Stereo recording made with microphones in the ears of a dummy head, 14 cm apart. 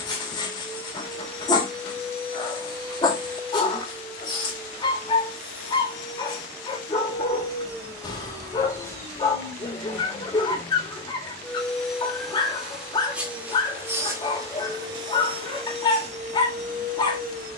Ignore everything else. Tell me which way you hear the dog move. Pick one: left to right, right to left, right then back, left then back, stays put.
stays put.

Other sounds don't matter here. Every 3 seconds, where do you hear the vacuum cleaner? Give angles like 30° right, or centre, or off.
30° left, 30° left, 20° left, 10° left, 10° right, 50° right.